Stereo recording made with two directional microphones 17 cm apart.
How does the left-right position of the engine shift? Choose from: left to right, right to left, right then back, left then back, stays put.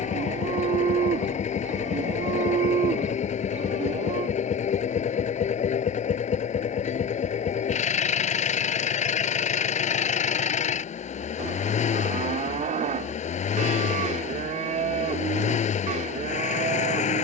stays put.